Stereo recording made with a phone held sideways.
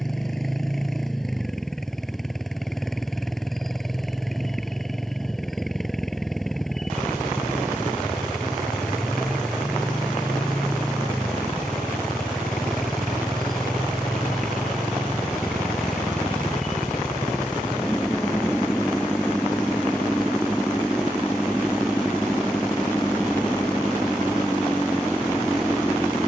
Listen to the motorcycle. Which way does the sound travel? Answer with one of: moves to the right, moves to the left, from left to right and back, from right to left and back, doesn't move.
doesn't move.